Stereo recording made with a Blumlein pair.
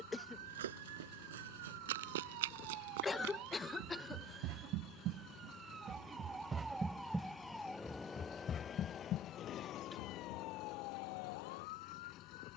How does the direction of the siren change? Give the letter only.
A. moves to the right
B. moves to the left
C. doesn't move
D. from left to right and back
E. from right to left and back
B.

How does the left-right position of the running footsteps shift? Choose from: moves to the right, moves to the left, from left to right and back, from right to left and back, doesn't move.
moves to the left.